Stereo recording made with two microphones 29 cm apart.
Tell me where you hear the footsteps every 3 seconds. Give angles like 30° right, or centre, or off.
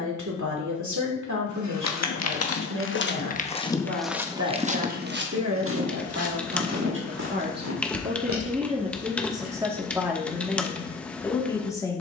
50° left, 10° right, 60° right, off.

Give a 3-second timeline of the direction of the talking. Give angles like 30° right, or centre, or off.
70° right, 60° right, 30° right, centre.